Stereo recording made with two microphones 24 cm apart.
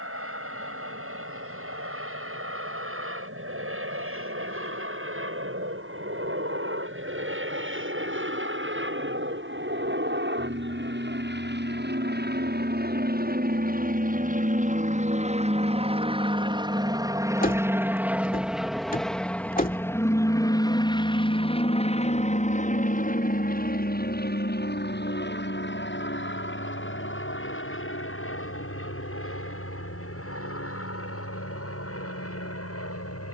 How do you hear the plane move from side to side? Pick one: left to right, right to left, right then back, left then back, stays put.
right to left.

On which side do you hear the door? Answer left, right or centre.
left.